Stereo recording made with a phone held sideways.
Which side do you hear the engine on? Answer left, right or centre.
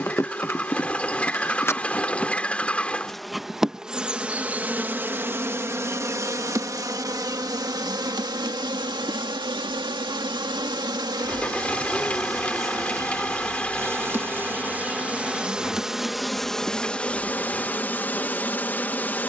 centre.